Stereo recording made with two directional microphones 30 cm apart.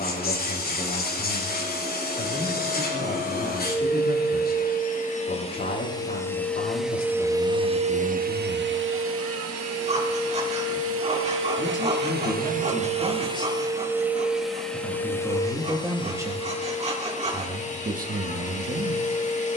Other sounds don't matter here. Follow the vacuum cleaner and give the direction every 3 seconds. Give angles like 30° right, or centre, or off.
30° left, 30° left, 10° right, 50° right, 10° right, 20° left, 20° left.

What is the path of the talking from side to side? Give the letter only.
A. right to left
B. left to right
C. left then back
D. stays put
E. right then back
B.